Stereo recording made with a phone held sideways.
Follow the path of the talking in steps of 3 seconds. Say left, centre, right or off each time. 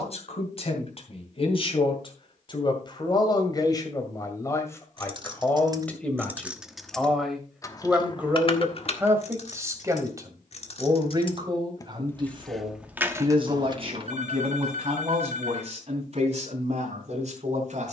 left, left, centre, right, right, right.